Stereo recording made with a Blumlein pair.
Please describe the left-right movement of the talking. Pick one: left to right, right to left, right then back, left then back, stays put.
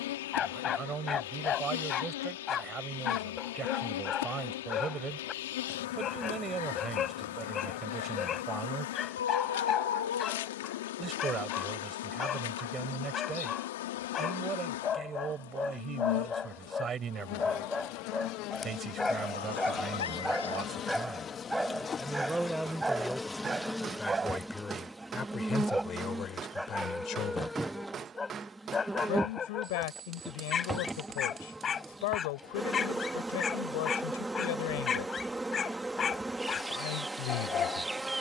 right to left.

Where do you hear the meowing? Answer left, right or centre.
left.